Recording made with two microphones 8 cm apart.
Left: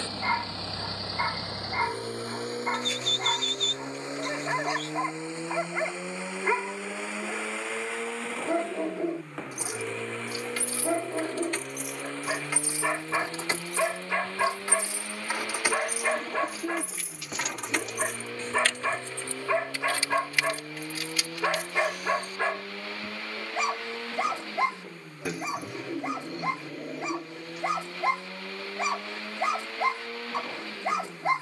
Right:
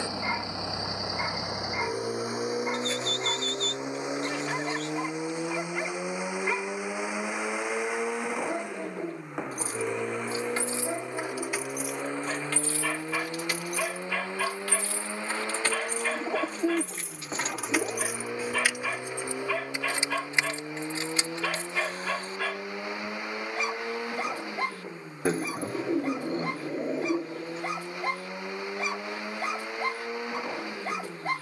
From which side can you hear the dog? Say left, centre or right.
left.